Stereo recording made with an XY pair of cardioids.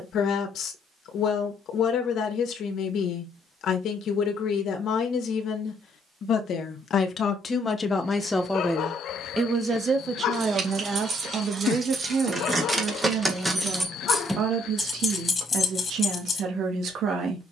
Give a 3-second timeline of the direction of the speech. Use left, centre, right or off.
left, left, left, right, right, right.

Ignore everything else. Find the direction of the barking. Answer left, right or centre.
left.